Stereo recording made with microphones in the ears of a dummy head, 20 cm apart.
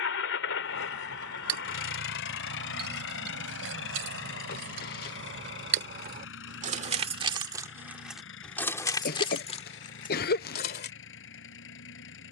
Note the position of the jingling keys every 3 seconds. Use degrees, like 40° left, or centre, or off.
70° right, 60° right, 20° right, 30° left.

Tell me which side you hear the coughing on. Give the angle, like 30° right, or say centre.
40° left.